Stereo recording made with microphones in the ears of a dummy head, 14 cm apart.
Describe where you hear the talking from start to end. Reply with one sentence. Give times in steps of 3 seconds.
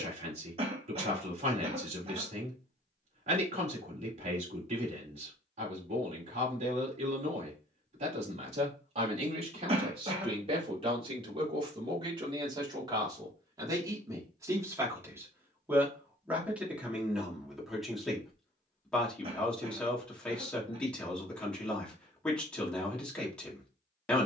In this clip you hear the talking on the right from 0 s and in the centre from 15 s.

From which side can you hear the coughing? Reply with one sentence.
In this clip you hear the coughing on the right.